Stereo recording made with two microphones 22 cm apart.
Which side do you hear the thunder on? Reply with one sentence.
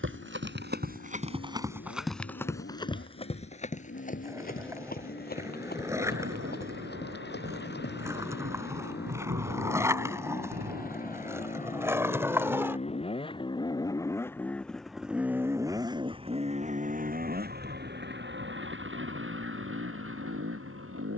You can hear the thunder on the right.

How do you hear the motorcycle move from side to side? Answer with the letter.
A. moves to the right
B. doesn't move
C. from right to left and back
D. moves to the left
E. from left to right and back
A.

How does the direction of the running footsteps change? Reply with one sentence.
In this clip you hear the running footsteps travel towards the left.